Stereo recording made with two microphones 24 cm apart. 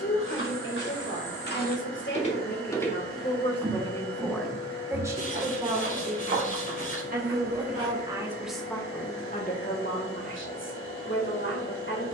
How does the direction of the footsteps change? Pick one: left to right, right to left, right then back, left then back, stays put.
left to right.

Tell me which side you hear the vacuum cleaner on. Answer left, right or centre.
left.